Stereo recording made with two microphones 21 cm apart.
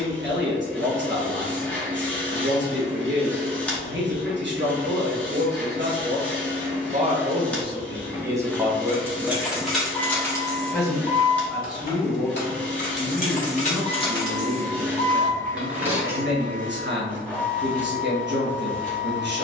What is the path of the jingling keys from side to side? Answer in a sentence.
You can hear the jingling keys go left and come back.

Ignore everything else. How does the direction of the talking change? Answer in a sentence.
You can hear the talking go left and come back.